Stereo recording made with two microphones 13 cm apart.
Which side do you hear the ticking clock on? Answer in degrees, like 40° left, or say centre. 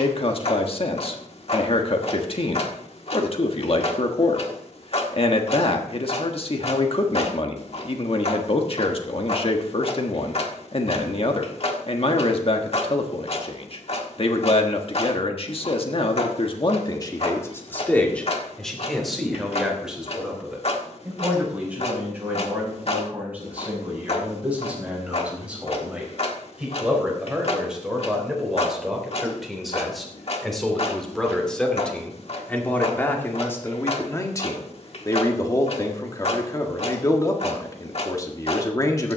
50° left.